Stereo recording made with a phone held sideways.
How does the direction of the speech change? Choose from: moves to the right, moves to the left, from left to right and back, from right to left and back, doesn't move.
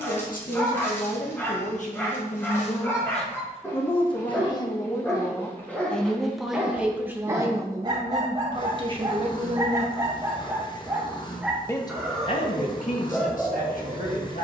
from left to right and back.